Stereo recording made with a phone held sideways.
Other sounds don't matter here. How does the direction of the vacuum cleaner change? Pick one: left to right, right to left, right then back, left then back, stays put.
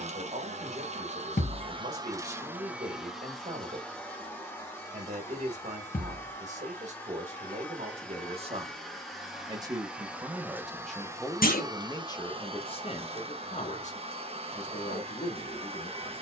left then back.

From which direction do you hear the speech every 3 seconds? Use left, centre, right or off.
right, right, right, centre, left, left.